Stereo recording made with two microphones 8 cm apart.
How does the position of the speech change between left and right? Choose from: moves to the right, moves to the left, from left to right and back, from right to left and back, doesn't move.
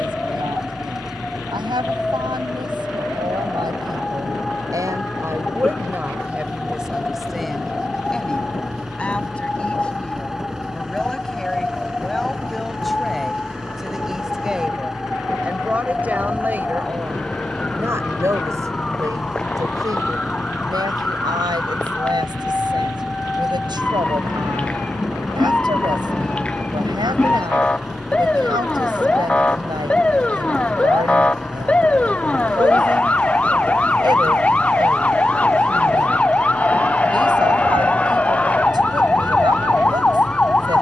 from right to left and back.